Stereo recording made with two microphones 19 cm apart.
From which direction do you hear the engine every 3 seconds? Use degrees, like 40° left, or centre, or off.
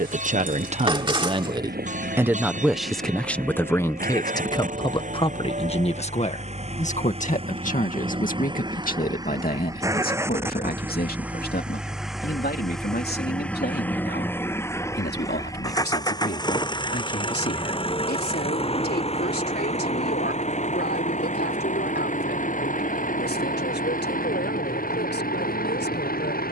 50° right, 40° right, 30° right, 10° right, 10° left, 20° left, 30° left, 40° left, 50° left.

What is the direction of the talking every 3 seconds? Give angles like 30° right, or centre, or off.
20° right, 20° left, 40° left, 50° left, 60° left, 60° left, 60° left, 60° left, 70° left.